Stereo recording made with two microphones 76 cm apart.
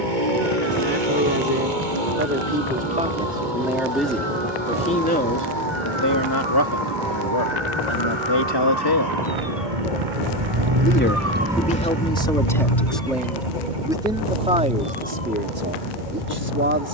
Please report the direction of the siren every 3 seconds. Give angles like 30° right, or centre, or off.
80° right, 80° right, 70° right, 40° right, 60° left, 80° left.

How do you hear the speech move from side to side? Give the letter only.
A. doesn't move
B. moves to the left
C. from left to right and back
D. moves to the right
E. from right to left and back
E.